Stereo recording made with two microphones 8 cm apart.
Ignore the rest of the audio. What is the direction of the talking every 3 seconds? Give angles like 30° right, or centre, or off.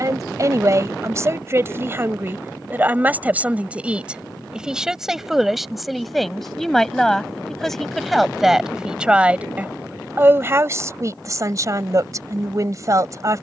30° right, 10° right, centre, 30° right, 40° right.